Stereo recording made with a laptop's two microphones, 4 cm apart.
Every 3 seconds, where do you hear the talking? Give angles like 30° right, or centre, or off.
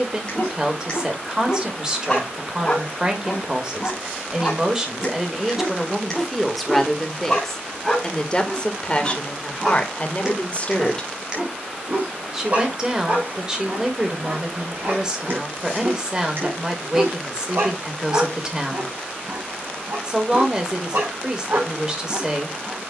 20° right, 20° right, 10° left, 30° left, 20° right, 20° right, 20° right, 20° right.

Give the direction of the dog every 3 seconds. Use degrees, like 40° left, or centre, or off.
20° left, 20° left, centre, 20° right, 50° right, 60° right, 70° right, 80° right.